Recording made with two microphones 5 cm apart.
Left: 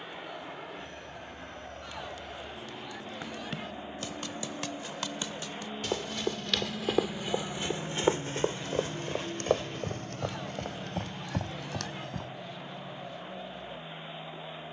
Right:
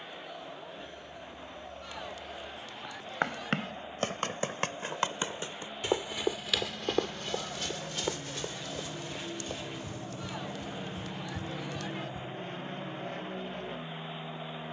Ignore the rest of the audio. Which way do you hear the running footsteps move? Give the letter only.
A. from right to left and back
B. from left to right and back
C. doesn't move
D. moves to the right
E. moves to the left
E.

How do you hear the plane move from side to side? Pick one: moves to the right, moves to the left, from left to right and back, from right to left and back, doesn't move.
moves to the right.